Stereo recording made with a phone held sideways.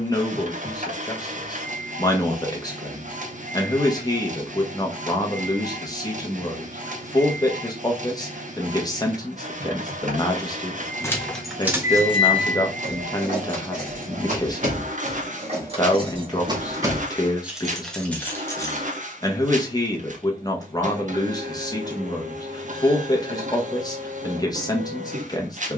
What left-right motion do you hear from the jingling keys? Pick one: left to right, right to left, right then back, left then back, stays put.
right then back.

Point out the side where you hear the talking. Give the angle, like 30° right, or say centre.
30° left.